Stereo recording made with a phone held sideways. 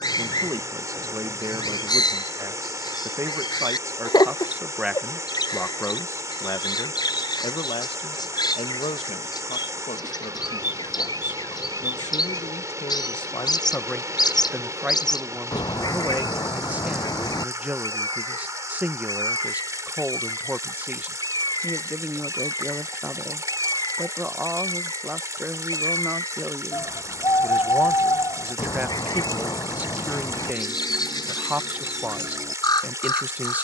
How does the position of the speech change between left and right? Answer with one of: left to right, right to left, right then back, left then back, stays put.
left then back.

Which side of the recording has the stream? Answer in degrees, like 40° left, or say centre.
20° right.